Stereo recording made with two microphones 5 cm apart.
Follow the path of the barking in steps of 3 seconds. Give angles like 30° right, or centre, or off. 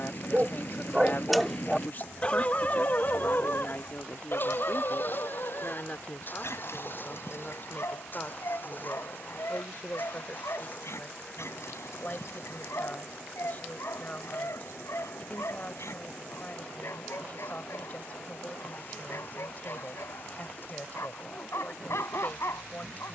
10° left, 60° left, 70° left, 70° left, 70° left, 70° left, 70° left, 70° left.